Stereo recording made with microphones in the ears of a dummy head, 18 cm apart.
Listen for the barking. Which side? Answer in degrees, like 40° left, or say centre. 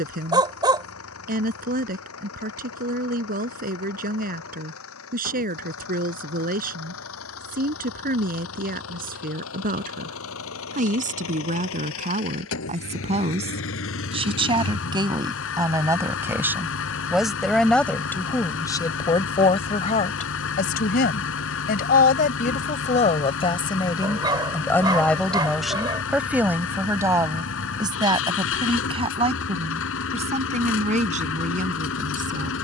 20° right.